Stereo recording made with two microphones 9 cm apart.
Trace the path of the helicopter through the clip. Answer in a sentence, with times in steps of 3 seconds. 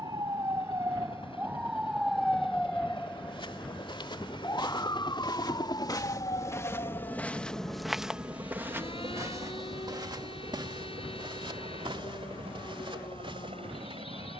In this clip you hear the helicopter on the left from 0 s, in the centre from 6 s and on the right from 9 s.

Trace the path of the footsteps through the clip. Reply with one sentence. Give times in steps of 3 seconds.
You can hear the footsteps not at all from 0 s, on the left from 3 s, in the centre from 6 s and on the right from 9 s.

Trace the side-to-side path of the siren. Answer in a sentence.
You can hear the siren move to the left.